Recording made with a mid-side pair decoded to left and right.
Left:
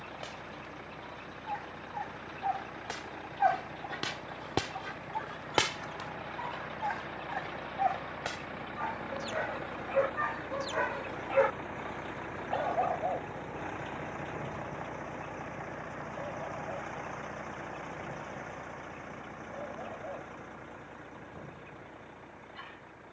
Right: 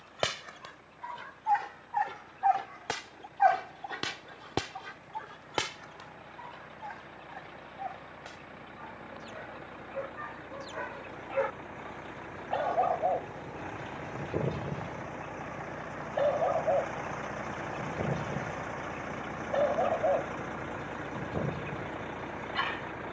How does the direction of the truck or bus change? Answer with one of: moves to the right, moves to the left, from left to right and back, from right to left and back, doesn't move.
moves to the right.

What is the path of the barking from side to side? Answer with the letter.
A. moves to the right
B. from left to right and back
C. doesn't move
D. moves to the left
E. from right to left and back
E.